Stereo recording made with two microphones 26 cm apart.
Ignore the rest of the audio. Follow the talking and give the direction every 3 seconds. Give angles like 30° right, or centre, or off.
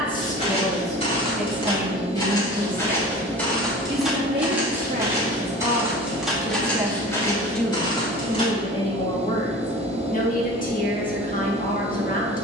10° right, 30° right, centre, 30° left.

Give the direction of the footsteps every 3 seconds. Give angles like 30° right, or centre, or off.
20° left, 10° right, 10° left, off.